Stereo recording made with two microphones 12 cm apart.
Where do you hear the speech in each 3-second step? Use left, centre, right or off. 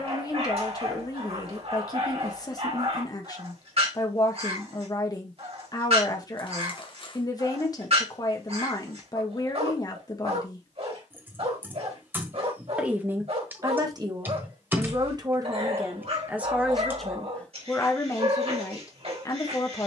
left, left, left, left, right, centre, left.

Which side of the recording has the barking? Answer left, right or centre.
right.